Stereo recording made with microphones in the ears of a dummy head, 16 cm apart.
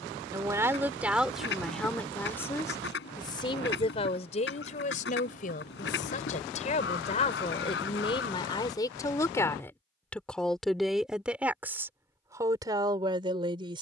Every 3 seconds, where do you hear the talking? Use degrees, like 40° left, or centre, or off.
centre, 40° left, 30° left, centre, 20° right.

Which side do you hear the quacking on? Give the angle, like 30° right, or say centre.
60° left.